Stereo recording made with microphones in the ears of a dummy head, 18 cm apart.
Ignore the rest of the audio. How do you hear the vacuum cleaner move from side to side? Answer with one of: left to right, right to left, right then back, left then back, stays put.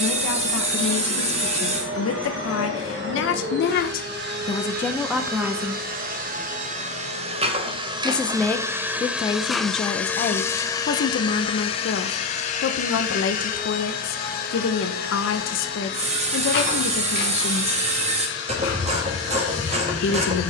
right to left.